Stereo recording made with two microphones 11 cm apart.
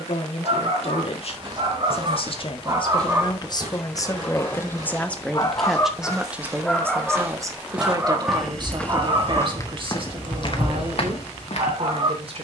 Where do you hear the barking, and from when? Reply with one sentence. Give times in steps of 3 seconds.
In this clip you hear the barking on the right from 0 s, in the centre from 3 s and on the right from 9 s.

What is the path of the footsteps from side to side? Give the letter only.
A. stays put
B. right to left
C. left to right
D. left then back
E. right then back
B.